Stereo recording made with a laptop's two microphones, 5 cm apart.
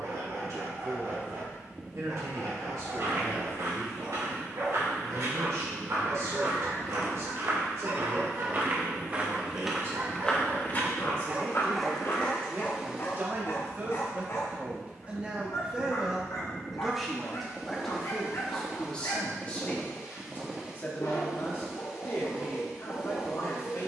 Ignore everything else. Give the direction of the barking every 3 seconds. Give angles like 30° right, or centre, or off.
70° right, 70° right, 70° right, 40° right, 40° left, 60° left, 60° left, 60° left.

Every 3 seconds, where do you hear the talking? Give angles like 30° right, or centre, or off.
70° right, 70° right, 60° right, 50° right, 30° right, 10° right, 20° left, 40° left.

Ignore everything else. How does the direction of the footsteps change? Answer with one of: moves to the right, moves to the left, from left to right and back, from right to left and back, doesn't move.
moves to the left.